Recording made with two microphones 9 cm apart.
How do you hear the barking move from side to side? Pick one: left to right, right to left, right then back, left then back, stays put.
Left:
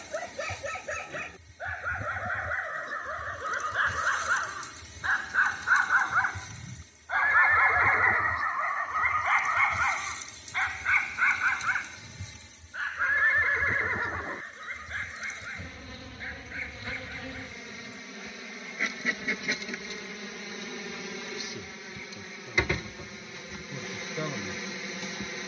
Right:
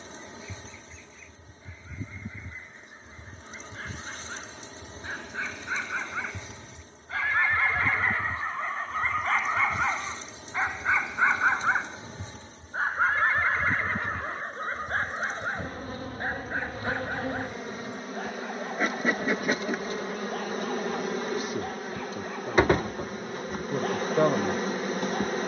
left to right.